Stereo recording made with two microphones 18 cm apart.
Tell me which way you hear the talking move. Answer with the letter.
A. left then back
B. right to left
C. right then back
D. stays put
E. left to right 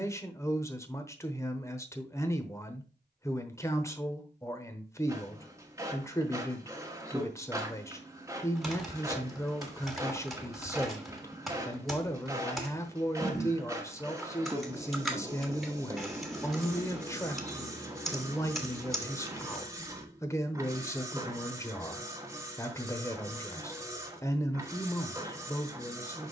D.